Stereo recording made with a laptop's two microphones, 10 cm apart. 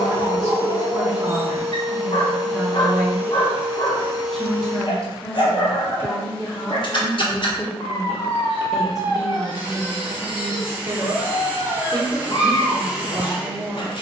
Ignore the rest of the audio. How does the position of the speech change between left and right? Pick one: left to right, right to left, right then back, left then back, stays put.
left then back.